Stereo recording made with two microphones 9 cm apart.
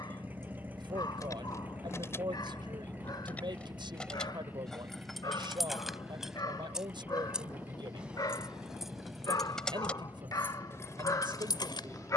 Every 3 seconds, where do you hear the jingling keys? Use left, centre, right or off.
left, centre, centre, left.